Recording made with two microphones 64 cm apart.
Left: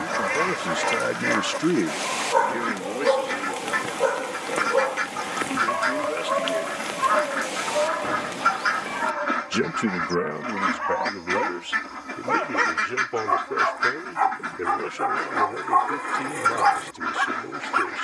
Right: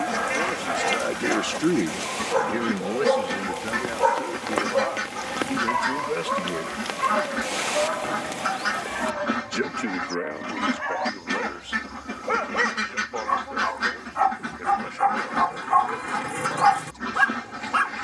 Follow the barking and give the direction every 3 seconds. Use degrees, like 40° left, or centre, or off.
50° right, 20° right, 20° left, 30° left, 10° left, 40° right.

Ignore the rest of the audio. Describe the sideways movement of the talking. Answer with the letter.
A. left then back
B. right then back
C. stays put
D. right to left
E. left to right
B.